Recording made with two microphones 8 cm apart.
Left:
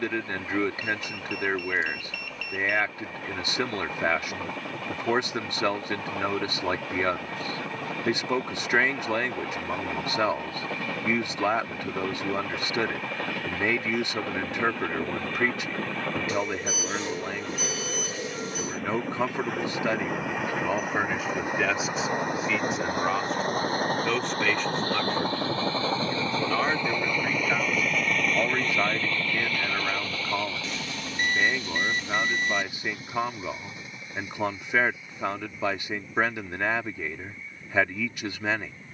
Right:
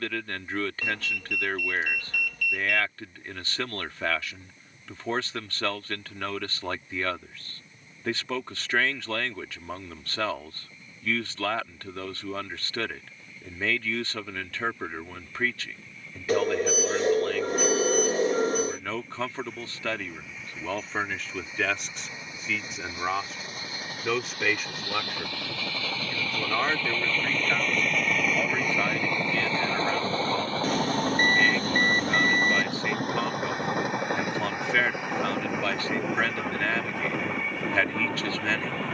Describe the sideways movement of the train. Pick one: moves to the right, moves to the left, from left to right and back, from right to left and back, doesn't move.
moves to the right.